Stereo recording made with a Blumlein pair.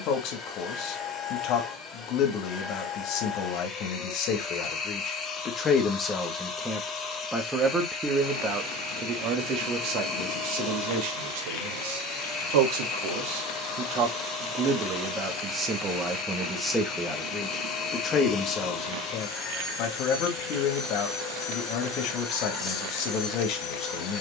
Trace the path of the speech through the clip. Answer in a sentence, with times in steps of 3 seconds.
You can hear the speech on the left from 0 s, in the centre from 6 s, on the right from 9 s, in the centre from 15 s and on the left from 18 s.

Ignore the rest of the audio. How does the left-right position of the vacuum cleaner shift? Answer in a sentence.
You can hear the vacuum cleaner stay in one place.